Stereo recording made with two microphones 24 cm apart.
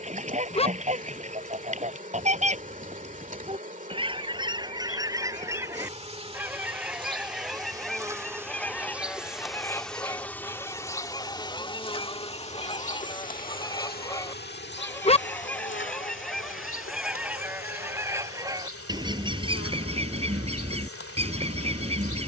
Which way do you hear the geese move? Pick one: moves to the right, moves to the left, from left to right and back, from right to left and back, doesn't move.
from right to left and back.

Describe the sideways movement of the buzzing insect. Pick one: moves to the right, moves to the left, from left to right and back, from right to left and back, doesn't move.
moves to the left.